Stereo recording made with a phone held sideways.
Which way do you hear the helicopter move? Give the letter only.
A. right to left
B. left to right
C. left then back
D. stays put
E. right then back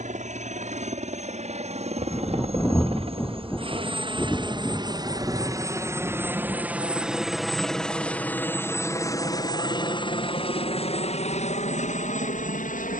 A.